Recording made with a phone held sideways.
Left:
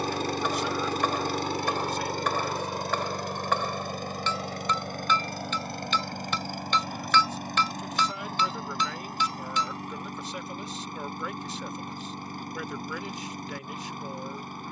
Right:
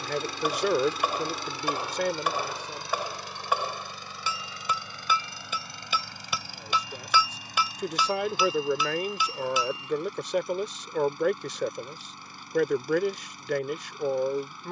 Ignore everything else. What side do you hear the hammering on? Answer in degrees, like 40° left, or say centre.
10° right.